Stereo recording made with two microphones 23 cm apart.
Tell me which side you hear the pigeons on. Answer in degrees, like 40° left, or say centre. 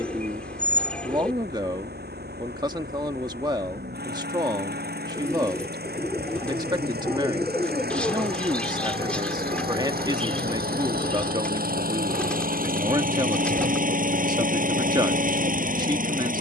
centre.